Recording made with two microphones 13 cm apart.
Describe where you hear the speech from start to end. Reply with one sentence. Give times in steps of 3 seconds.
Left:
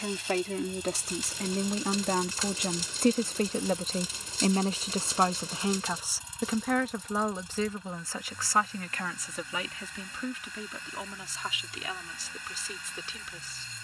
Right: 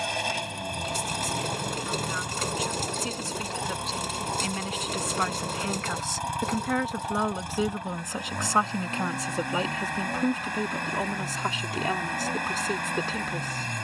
You can hear the speech on the left from 0 s, in the centre from 6 s and on the right from 9 s.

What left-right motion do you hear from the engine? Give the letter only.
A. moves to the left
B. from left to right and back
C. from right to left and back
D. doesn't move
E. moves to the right
D.